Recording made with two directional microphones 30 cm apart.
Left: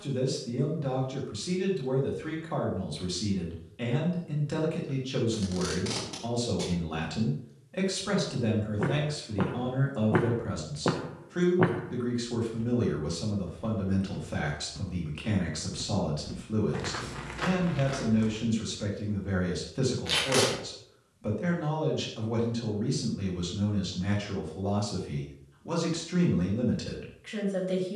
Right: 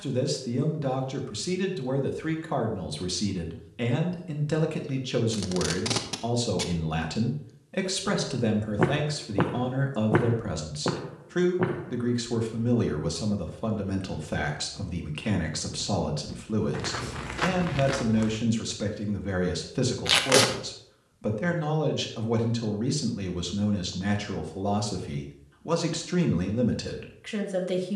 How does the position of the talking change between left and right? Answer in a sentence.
In this clip you hear the talking stay in one place.